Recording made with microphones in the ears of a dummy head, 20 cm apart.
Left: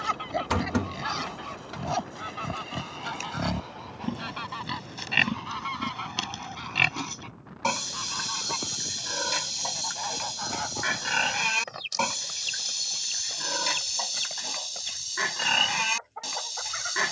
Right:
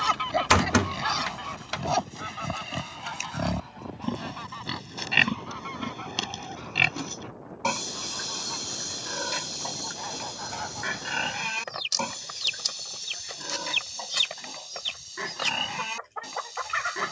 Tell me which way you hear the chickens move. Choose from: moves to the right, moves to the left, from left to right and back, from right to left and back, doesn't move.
from right to left and back.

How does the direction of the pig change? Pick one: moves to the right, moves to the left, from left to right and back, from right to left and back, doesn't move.
moves to the left.